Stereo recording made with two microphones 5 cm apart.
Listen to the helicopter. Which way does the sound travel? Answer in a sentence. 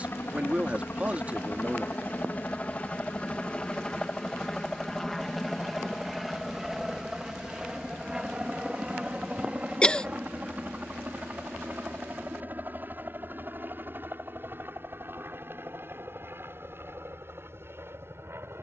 You can hear the helicopter travel towards the right.